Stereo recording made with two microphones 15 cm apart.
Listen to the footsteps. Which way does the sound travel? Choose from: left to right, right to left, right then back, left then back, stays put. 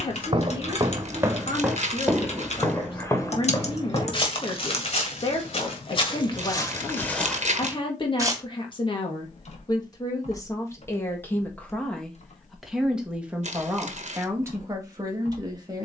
left then back.